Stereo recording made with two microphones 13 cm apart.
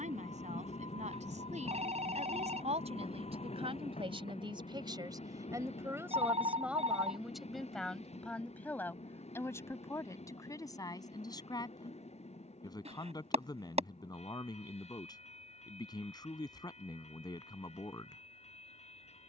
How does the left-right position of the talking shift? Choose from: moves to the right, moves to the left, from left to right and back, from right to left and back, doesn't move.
moves to the left.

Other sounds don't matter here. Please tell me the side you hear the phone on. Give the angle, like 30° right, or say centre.
60° right.